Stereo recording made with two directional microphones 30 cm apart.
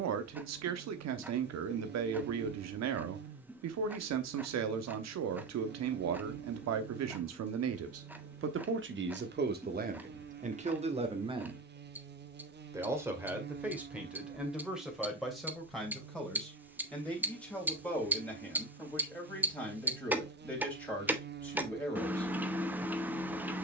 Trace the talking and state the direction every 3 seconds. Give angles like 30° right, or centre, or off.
70° right, 70° right, 60° right, 30° right, 10° right, centre, 10° left, 10° left.